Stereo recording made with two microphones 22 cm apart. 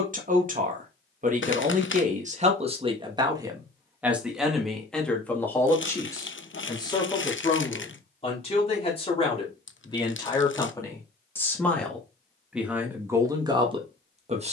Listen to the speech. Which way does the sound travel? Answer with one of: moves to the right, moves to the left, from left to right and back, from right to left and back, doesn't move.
from right to left and back.